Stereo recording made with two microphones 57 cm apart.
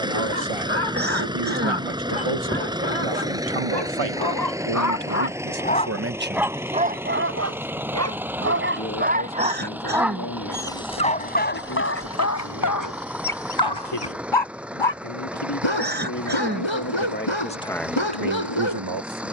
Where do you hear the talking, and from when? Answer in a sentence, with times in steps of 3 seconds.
In this clip you hear the talking on the right from 0 s, in the centre from 6 s, on the left from 9 s and on the right from 18 s.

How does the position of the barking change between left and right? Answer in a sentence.
You can hear the barking move from left to right and back again.